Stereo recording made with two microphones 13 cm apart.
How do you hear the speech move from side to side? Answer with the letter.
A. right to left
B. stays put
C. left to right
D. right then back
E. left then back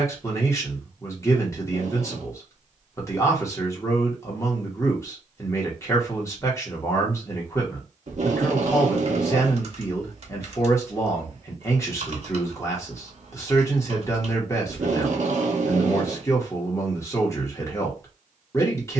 B.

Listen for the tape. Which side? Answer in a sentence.
In this clip you hear the tape on the right.